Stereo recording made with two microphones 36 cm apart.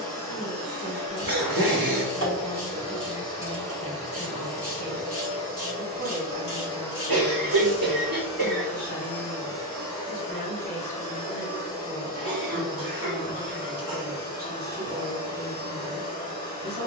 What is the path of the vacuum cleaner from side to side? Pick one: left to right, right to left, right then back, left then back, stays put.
right to left.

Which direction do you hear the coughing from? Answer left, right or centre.
right.